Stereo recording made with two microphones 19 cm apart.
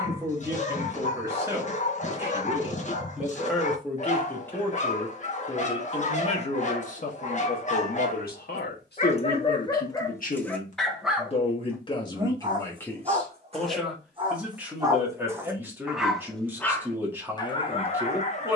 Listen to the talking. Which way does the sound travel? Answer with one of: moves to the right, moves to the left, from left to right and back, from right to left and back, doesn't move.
from right to left and back.